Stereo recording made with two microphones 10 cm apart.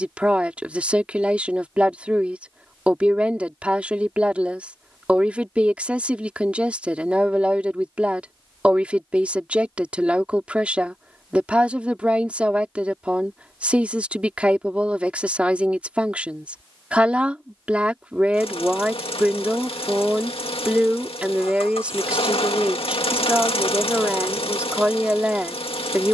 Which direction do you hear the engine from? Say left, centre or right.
left.